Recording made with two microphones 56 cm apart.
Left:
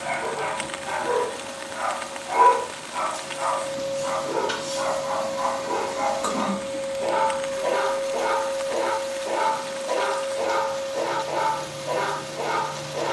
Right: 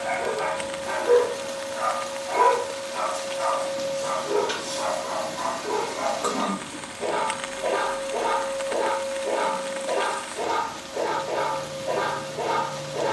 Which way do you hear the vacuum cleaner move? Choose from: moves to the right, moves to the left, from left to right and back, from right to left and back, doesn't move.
moves to the right.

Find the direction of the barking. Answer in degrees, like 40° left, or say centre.
30° left.